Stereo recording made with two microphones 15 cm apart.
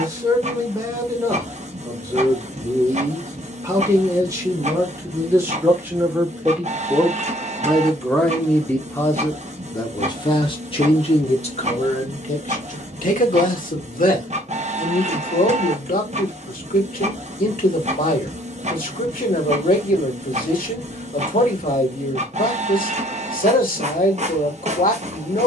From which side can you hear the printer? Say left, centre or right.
right.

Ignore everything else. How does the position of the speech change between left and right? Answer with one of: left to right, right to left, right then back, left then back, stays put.
right to left.